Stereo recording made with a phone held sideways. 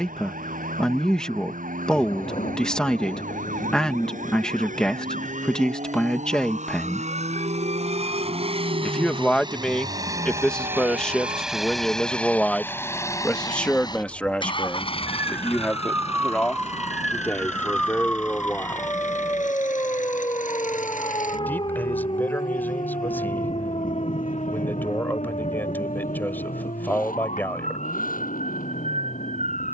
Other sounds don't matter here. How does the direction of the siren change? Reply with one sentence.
In this clip you hear the siren move to the left.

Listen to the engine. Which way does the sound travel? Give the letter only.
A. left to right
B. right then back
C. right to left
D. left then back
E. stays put
C.